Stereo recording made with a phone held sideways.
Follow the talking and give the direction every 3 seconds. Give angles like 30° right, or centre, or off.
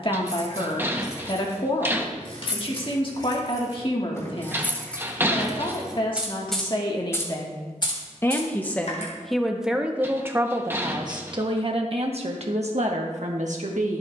40° left, 40° left, 30° left, 20° right, 60° right.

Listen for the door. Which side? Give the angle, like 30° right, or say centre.
20° right.